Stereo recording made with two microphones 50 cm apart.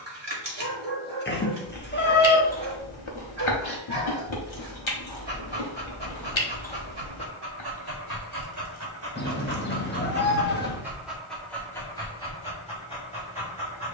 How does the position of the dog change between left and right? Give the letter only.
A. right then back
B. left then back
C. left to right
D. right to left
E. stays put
D.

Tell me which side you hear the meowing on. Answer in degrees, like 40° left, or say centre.
20° left.